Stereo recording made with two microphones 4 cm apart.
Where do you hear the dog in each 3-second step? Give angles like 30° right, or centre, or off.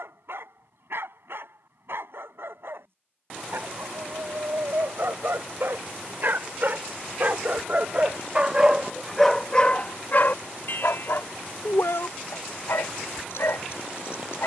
70° right, 60° right, 40° right, 50° left, 80° left.